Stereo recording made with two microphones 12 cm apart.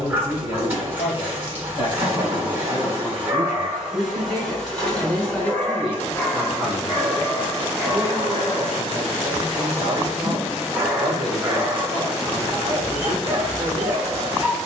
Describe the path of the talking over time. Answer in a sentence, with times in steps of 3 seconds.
In this clip you hear the talking on the left from 0 s, in the centre from 3 s and on the right from 6 s.